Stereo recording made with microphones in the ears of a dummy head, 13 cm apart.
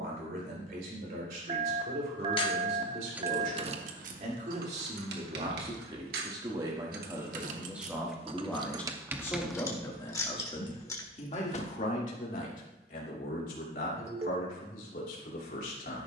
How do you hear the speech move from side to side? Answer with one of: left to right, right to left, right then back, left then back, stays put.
right to left.